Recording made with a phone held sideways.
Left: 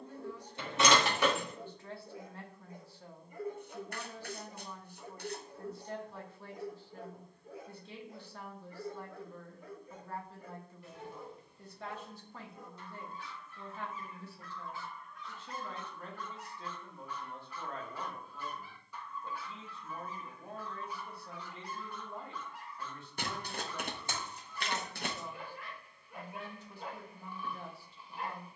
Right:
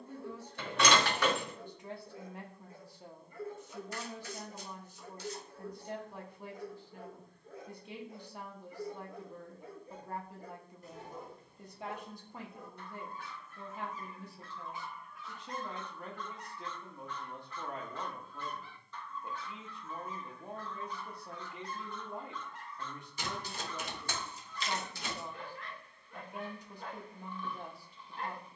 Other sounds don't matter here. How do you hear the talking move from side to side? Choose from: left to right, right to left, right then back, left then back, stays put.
stays put.